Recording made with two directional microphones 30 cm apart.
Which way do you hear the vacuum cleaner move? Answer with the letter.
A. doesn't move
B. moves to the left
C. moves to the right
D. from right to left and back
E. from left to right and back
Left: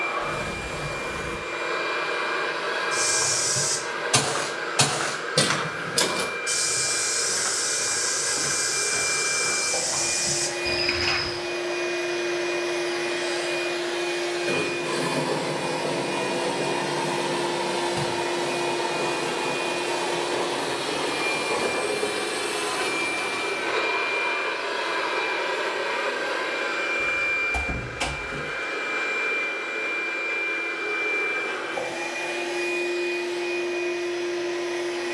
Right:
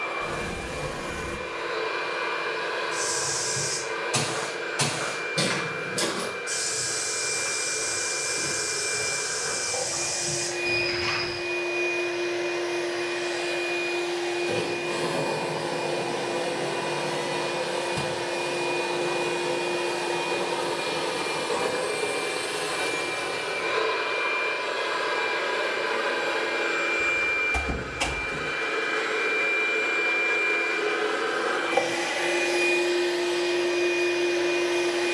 C.